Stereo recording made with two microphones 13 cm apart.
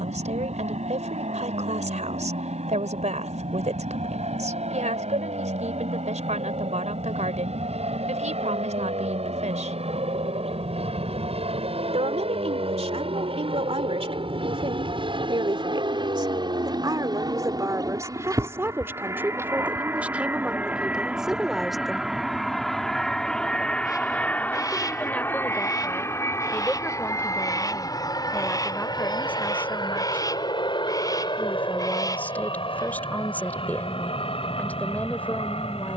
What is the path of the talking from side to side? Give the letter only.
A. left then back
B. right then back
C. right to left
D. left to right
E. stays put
C.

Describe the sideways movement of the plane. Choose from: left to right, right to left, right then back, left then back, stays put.
right to left.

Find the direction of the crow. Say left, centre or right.
left.